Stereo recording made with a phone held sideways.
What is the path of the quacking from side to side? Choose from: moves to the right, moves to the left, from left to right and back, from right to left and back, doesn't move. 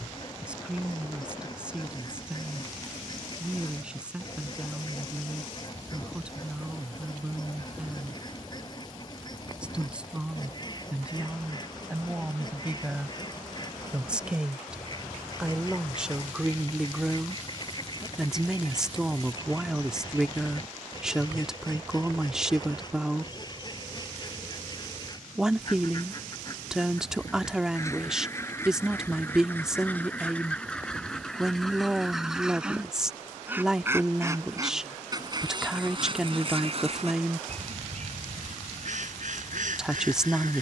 moves to the right.